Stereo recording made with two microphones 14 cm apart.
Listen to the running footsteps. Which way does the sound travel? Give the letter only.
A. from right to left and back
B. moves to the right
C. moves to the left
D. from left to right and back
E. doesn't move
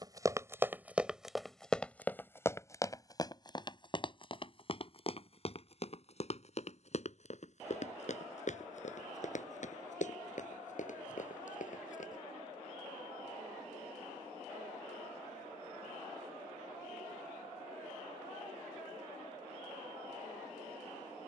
C.